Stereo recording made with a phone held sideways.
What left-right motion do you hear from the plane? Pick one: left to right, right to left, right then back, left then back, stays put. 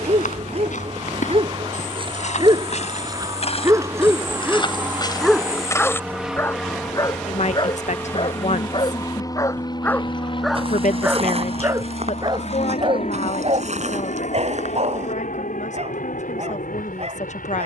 right to left.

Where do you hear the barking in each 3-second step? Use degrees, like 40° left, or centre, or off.
40° right, 10° right, 30° left, centre, 40° right, 50° right.